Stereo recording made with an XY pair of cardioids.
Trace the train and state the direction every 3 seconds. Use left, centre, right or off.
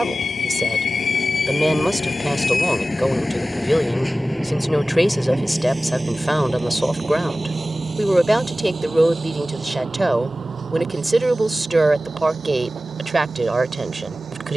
left, centre, right, right, right.